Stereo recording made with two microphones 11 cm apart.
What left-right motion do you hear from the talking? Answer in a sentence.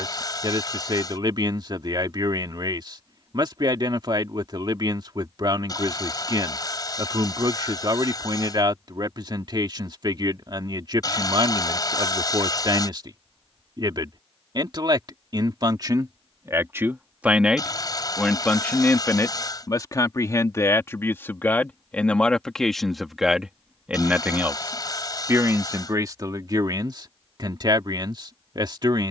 You can hear the talking go left and come back.